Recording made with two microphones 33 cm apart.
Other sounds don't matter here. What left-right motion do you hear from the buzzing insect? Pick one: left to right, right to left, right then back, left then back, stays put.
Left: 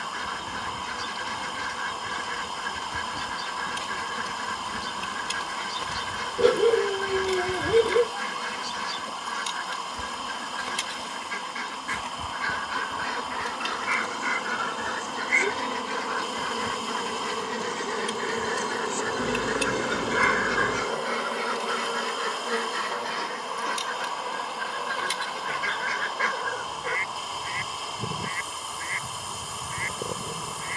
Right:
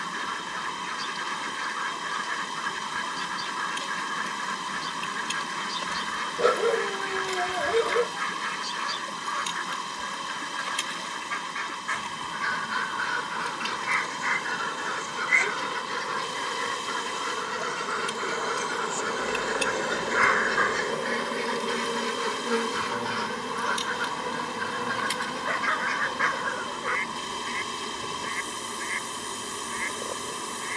left to right.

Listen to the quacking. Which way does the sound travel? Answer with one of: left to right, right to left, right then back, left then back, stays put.
right then back.